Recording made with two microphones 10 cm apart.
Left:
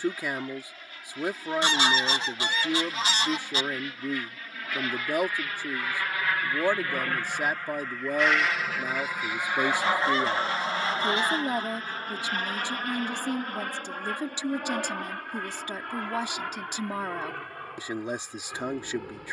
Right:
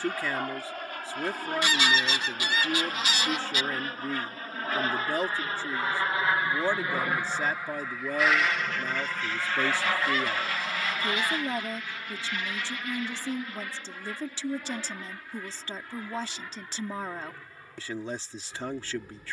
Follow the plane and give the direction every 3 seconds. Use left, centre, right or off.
right, right, centre, left, left, left, left.